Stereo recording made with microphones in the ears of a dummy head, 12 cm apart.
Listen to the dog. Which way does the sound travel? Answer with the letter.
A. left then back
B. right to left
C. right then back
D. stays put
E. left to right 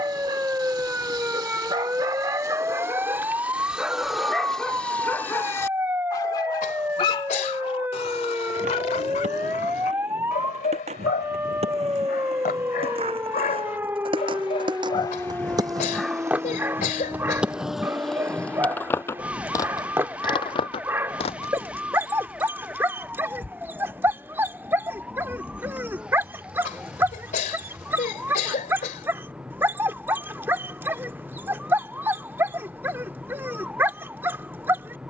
A.